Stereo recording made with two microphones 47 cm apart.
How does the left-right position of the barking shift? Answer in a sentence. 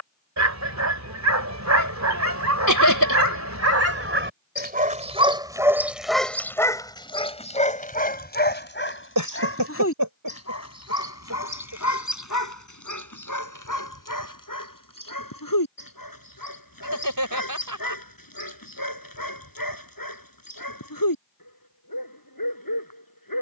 In this clip you hear the barking move to the left.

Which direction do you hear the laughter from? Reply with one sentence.
You can hear the laughter on the right.